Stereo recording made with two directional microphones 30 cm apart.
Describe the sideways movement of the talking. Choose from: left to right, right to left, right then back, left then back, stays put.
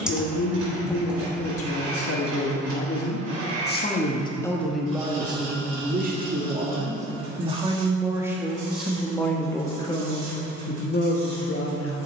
right then back.